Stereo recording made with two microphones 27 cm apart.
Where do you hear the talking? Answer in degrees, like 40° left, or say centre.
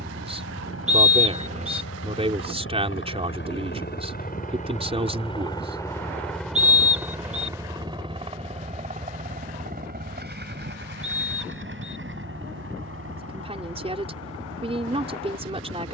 20° right.